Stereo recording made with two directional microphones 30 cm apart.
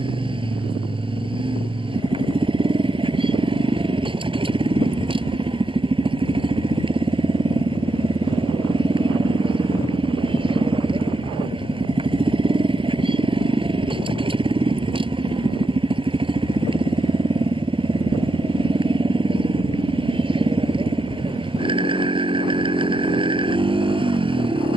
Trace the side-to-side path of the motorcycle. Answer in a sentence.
In this clip you hear the motorcycle stay put.